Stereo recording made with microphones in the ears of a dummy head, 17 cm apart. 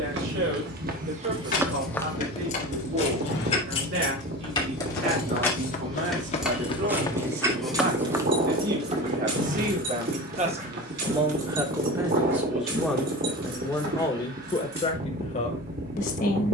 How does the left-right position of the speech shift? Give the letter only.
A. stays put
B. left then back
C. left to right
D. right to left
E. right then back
D.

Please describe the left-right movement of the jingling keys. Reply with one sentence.
In this clip you hear the jingling keys move from left to right.